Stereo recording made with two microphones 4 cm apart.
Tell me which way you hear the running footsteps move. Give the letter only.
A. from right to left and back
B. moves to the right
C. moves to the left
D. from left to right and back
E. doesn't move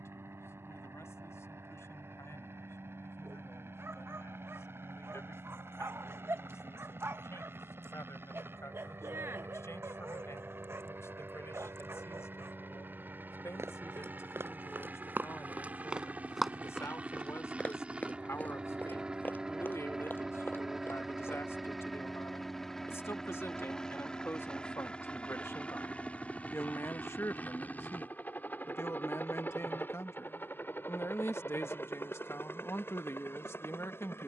C.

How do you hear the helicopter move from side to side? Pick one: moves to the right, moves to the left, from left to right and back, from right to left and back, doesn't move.
moves to the left.